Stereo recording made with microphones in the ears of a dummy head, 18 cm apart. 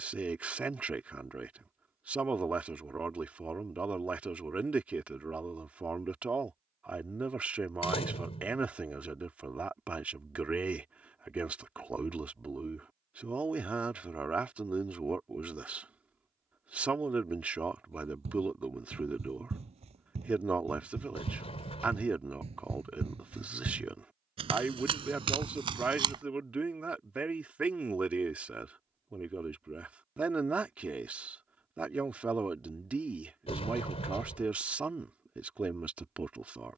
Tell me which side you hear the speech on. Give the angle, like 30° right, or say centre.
10° right.